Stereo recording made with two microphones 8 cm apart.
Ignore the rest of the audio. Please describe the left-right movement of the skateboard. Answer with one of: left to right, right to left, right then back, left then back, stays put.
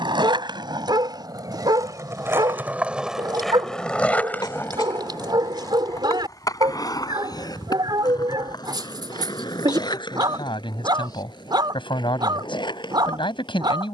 right to left.